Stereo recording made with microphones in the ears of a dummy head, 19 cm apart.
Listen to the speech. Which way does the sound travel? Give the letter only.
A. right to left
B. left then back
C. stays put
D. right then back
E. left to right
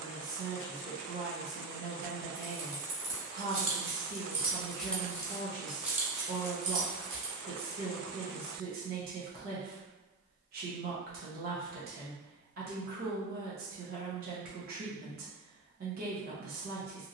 C.